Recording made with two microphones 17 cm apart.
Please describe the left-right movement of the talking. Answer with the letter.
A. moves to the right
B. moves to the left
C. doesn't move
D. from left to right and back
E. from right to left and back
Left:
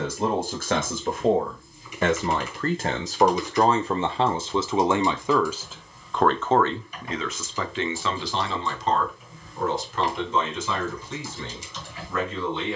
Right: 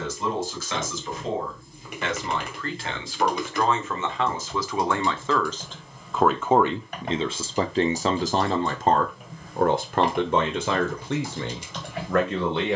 A.